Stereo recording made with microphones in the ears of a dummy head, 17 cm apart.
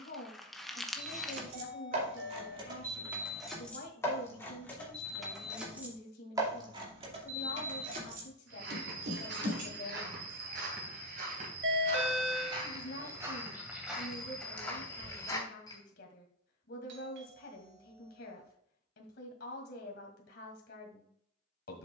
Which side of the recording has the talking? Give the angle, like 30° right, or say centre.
60° left.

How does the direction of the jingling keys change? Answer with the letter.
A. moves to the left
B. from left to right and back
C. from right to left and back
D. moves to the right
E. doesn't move
C.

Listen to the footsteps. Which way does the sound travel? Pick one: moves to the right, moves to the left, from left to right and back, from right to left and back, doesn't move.
moves to the left.